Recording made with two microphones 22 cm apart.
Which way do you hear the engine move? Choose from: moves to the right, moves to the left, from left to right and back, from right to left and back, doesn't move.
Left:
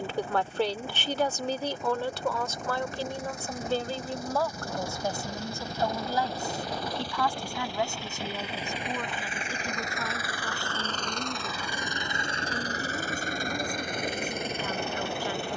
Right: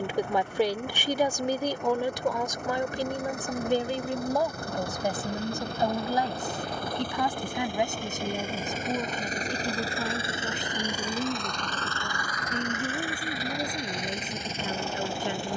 moves to the left.